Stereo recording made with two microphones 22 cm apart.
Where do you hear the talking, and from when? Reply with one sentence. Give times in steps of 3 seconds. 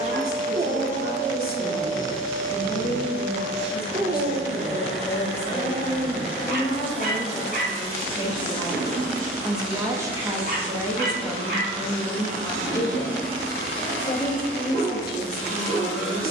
You can hear the talking on the left from 0 s, in the centre from 9 s and on the left from 12 s.